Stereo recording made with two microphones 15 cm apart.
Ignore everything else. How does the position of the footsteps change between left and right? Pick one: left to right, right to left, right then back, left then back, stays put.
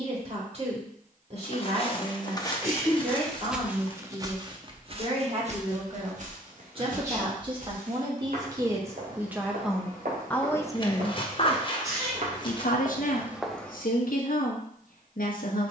right then back.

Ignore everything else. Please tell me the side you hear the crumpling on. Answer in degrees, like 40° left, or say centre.
30° left.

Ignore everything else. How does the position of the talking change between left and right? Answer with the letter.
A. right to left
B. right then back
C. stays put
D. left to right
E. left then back
A.